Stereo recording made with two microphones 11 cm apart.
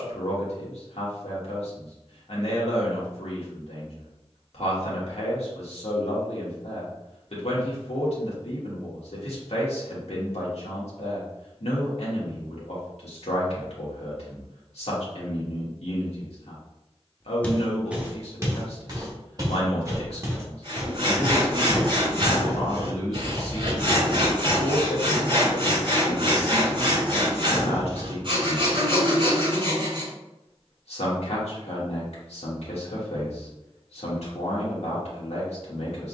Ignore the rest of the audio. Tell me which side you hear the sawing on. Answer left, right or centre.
right.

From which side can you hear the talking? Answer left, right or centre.
left.